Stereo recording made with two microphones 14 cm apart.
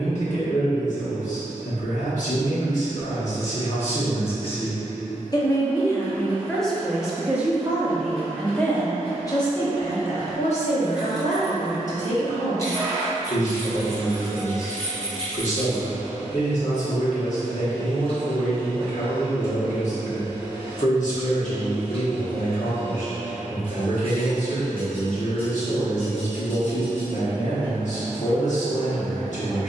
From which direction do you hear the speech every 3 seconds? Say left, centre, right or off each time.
left, left, centre, left, left, left, left, left, left, left.